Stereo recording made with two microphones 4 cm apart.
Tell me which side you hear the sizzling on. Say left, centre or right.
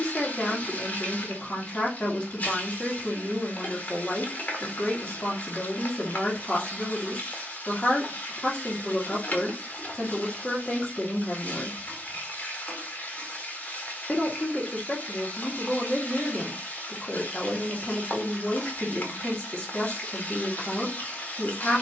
left.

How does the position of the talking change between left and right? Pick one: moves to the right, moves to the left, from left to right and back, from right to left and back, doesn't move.
doesn't move.